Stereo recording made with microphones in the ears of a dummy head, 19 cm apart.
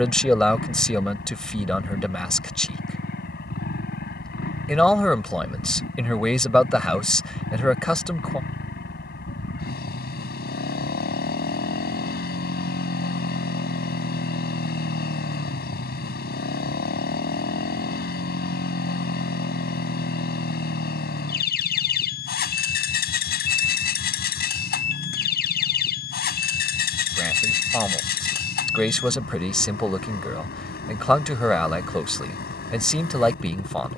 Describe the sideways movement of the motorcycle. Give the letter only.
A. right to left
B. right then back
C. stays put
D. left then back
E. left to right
C.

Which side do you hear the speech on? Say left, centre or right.
centre.